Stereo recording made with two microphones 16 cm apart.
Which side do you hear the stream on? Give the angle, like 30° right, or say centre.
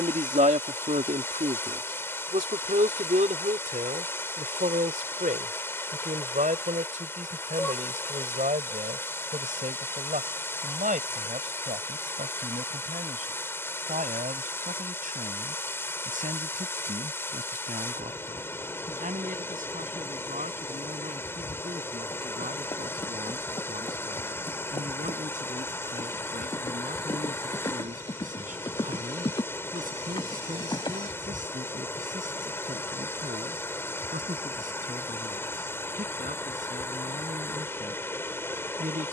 10° left.